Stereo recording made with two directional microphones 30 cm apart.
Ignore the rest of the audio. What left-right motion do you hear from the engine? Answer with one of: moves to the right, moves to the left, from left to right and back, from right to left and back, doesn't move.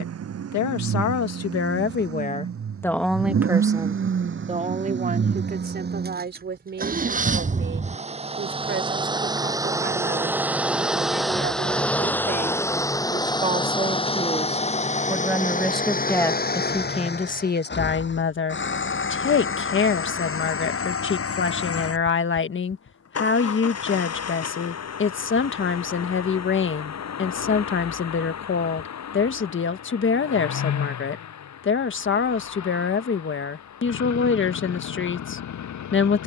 moves to the left.